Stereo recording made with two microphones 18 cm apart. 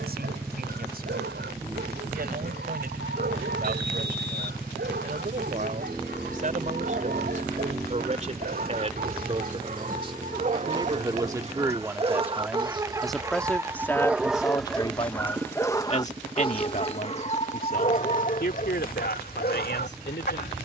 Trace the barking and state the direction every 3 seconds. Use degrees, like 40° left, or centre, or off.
70° right, 60° right, 60° right, 40° right, 10° right, 30° left, 50° left.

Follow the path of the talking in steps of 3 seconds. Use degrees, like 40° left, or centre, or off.
60° right, 50° right, 40° right, 20° right, 10° left, 40° left, 60° left.